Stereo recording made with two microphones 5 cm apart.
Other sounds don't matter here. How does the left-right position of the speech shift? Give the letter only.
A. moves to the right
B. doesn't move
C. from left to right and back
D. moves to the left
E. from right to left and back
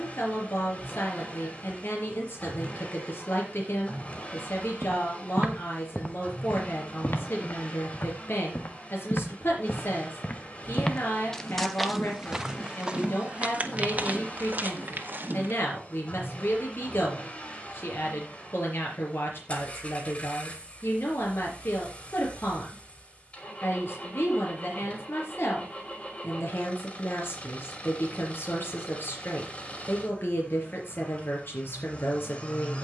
B.